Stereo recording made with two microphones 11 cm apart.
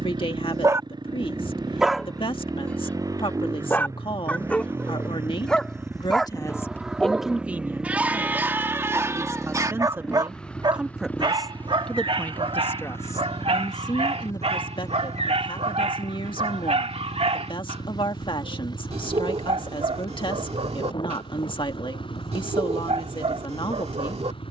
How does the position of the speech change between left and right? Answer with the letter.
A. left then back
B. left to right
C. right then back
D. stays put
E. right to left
C.